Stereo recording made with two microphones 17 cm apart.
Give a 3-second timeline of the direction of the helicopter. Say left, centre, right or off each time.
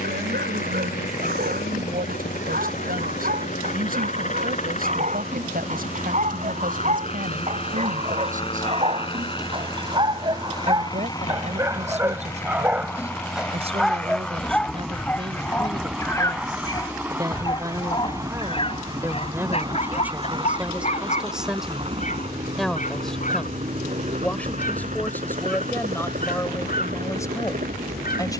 left, left, left, left, centre, centre, right, right, right, right.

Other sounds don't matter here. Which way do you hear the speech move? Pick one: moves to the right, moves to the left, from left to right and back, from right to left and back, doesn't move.
moves to the left.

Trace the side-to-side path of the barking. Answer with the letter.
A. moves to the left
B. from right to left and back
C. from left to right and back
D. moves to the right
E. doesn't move
A.